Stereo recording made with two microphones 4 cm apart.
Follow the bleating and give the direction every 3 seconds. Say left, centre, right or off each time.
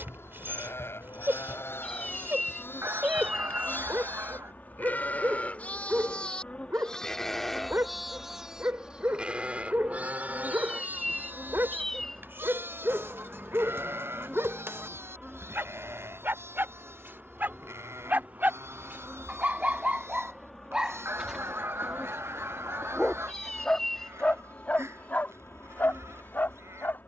left, left, centre, right, right, right, right, right, right.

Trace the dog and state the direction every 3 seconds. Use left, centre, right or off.
right, right, right, right, right, right, right, centre, left.